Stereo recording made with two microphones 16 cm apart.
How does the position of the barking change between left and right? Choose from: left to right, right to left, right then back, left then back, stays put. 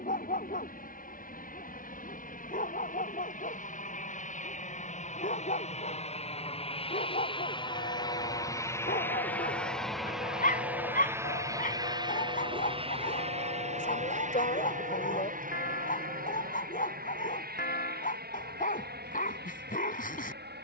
stays put.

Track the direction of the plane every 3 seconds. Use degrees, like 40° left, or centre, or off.
60° left, 50° left, 30° left, 10° right, 40° right, 60° right, 60° right.